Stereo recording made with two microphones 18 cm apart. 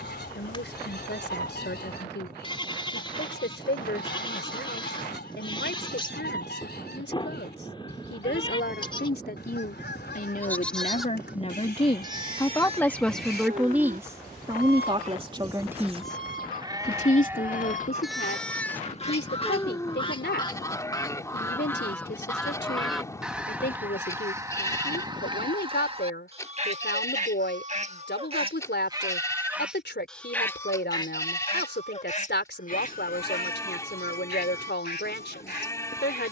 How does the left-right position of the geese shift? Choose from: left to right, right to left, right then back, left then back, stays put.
right then back.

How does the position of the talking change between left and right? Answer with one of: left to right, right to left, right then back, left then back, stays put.
right then back.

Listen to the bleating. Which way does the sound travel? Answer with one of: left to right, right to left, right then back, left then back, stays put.
right then back.